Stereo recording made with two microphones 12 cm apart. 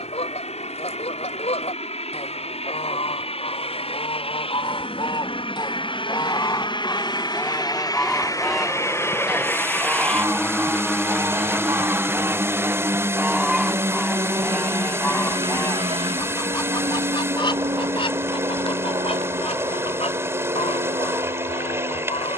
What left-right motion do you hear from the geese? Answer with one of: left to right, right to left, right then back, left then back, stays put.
right then back.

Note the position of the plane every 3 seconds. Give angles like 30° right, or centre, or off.
60° left, 50° left, 40° left, 10° left, 20° right, 40° right, 60° right, 60° right.